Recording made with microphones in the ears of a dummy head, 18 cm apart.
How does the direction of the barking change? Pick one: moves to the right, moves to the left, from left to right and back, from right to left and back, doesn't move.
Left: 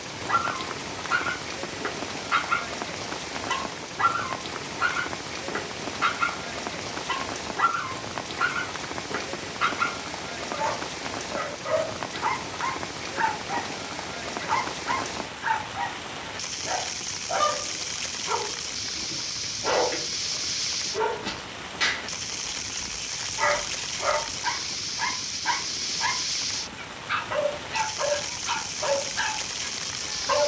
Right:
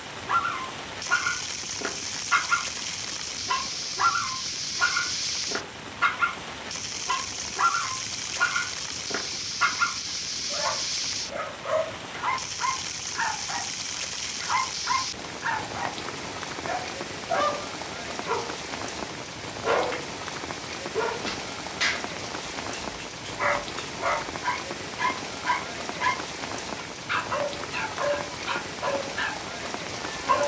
doesn't move.